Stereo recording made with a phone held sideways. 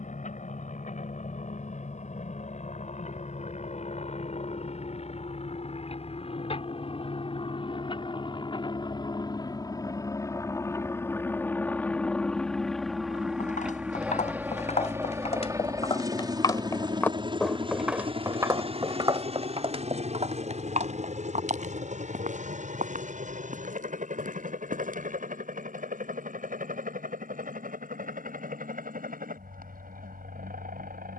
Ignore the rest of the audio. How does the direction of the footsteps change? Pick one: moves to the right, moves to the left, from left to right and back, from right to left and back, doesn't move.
moves to the right.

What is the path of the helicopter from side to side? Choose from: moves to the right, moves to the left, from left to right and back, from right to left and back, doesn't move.
moves to the right.